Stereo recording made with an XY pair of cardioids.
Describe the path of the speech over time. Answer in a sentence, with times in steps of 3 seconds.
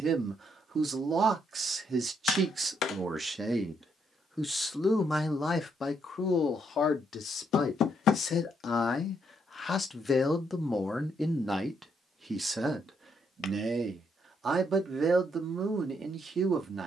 In this clip you hear the speech on the right from 0 s, in the centre from 3 s, on the left from 6 s, in the centre from 9 s and on the right from 12 s.